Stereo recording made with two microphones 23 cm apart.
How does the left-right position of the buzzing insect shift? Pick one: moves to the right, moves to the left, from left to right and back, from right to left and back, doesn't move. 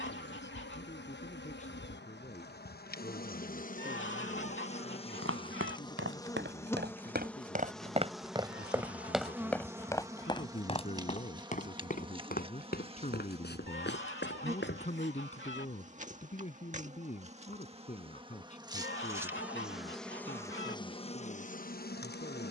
from left to right and back.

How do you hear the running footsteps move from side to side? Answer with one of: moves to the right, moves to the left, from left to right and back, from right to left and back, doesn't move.
moves to the left.